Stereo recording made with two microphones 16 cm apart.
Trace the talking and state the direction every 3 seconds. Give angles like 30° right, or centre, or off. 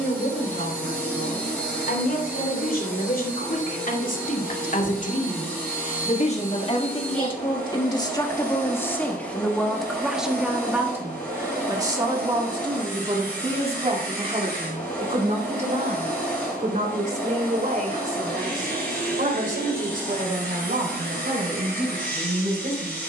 70° left, 60° left, 30° left, 10° right, 30° right, 50° right, 60° right, 60° right.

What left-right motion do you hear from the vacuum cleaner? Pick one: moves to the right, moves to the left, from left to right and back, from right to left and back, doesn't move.
doesn't move.